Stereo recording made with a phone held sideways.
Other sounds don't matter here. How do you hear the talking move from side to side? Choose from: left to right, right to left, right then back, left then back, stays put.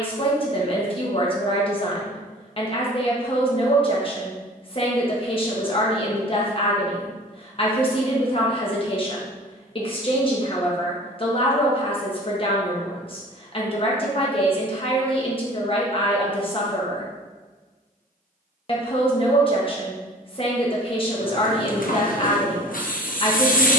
stays put.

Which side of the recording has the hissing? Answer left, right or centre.
left.